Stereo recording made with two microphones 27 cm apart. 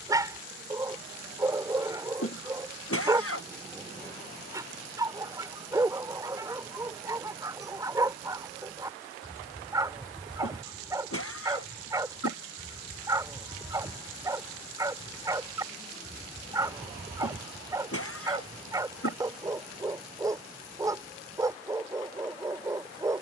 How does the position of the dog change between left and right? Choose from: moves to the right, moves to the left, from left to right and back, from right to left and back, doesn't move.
doesn't move.